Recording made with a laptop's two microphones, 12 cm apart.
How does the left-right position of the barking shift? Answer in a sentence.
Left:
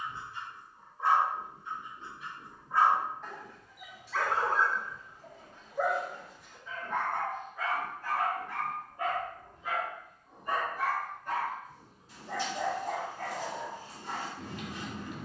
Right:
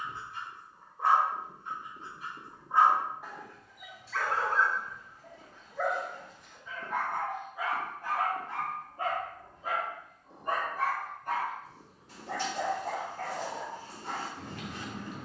You can hear the barking go left and come back.